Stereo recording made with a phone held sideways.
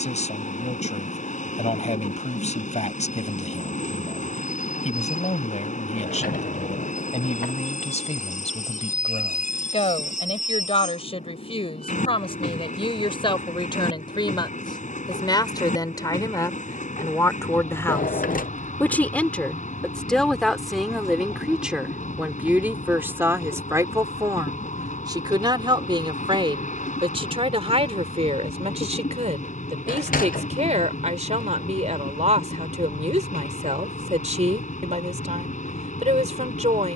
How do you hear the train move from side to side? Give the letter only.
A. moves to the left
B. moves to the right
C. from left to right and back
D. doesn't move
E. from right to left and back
D.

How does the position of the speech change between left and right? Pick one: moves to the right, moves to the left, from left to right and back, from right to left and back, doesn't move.
moves to the right.